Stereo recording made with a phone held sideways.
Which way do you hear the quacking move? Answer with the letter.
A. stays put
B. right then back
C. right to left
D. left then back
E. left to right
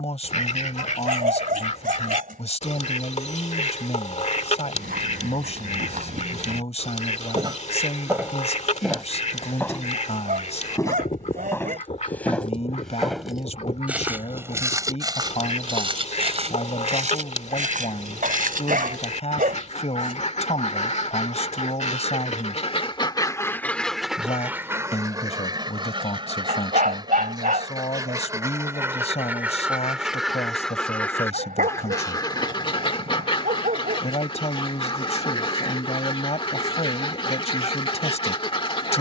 B.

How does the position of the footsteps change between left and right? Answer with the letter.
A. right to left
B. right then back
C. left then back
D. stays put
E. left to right
C.